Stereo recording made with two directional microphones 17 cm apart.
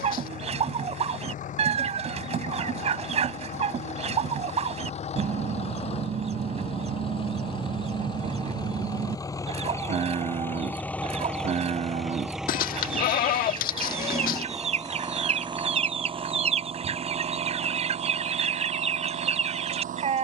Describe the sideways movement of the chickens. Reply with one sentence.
In this clip you hear the chickens stay in one place.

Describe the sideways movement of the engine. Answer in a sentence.
In this clip you hear the engine travel towards the right.